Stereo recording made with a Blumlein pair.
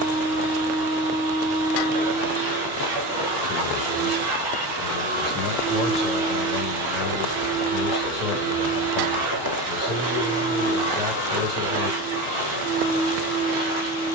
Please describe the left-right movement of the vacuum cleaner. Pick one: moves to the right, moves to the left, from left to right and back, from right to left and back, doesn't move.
doesn't move.